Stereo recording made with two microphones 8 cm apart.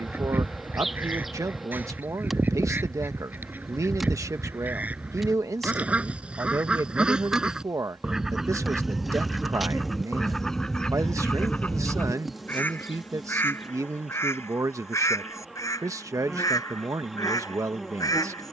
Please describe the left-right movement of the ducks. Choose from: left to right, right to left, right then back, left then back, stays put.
right to left.